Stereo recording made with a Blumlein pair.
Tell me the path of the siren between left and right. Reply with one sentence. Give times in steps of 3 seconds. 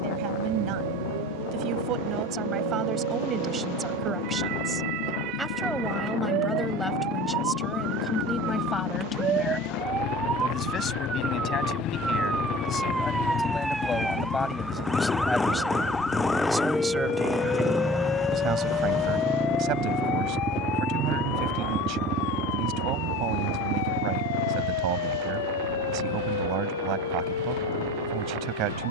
In this clip you hear the siren on the right from 0 s, in the centre from 12 s and on the left from 18 s.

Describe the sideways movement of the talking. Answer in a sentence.
You can hear the talking move from right to left and back again.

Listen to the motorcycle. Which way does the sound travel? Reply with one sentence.
In this clip you hear the motorcycle go from the left side to the right.